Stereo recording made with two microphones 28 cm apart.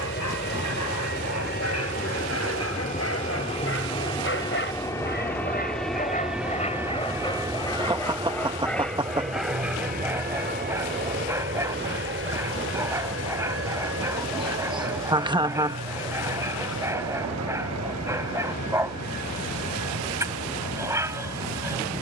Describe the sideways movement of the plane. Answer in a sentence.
You can hear the plane go from the left side to the right.